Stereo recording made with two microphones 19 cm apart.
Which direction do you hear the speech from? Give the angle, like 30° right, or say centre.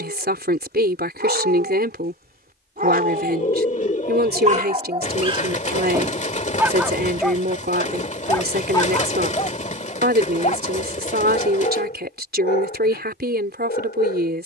60° right.